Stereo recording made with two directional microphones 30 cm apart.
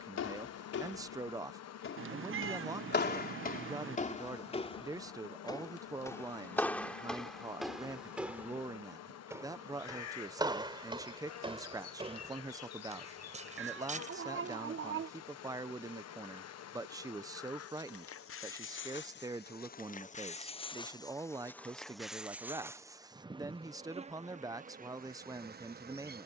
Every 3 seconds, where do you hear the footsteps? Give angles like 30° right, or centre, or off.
50° left, 20° left, centre, 10° right, 20° right, off, off, off, off.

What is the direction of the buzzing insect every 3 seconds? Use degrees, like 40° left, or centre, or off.
60° left, 60° left, 60° left, 60° left, 60° left, 60° left, 30° left, 10° right, 30° right.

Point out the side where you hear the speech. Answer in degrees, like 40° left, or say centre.
10° right.